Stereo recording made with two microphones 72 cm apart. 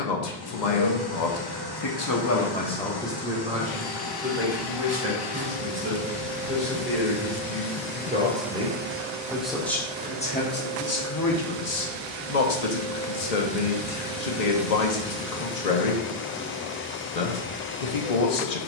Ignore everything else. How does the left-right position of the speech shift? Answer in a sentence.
In this clip you hear the speech move from left to right and back again.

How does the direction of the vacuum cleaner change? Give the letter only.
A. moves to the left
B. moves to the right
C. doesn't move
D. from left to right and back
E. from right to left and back
D.